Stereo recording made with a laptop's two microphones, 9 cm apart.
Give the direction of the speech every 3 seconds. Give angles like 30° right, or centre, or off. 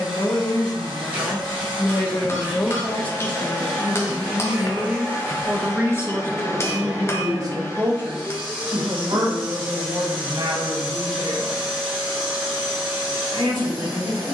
40° left, centre, 40° right, 60° right, 70° right.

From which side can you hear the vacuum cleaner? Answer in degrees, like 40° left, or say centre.
20° right.